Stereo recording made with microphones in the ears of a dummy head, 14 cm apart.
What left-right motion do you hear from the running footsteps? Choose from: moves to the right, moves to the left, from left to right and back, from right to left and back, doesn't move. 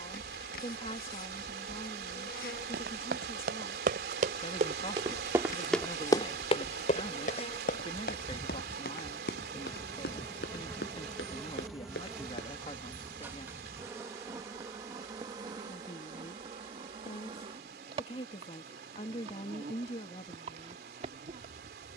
moves to the left.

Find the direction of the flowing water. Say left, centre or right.
right.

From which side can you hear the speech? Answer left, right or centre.
left.